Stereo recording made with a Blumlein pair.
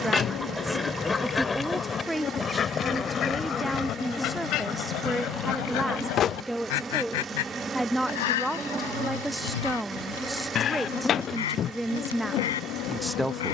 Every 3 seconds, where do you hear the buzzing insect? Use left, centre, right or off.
left, centre, centre, centre, left.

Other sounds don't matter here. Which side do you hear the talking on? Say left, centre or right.
centre.